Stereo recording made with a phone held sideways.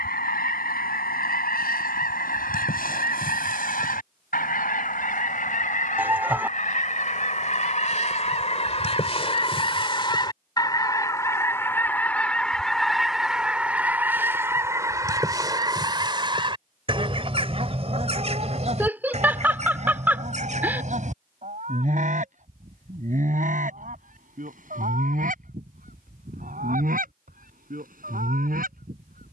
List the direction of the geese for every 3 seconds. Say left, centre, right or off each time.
left, left, left, left, centre, right, right, right, right, right.